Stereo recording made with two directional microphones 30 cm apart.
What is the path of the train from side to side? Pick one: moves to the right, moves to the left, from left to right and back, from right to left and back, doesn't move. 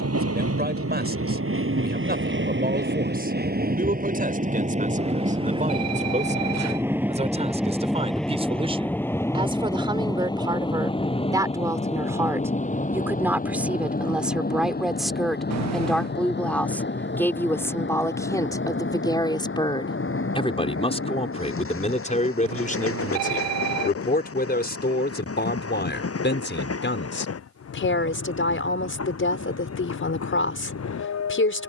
moves to the left.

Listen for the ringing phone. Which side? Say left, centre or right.
right.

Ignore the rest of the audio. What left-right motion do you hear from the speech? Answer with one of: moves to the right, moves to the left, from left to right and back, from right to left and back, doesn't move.
moves to the left.